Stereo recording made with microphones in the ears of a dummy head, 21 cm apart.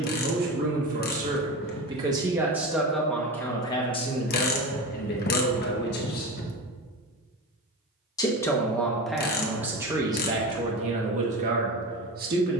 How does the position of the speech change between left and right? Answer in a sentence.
In this clip you hear the speech move from right to left and back again.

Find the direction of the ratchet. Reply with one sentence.
You can hear the ratchet on the left.